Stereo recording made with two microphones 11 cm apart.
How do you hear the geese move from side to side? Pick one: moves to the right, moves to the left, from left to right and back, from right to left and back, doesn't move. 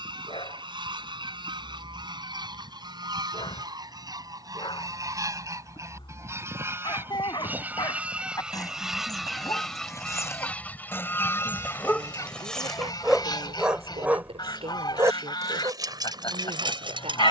moves to the left.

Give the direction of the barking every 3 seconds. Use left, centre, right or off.
left, left, left, left, centre, right.